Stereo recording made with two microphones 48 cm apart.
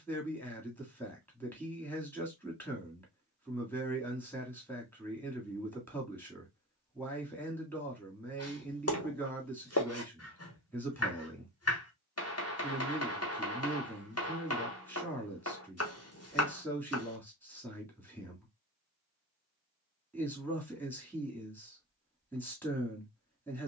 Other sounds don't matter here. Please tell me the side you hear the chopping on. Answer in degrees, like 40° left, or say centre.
30° left.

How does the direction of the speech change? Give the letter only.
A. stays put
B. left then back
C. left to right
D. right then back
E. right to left
A.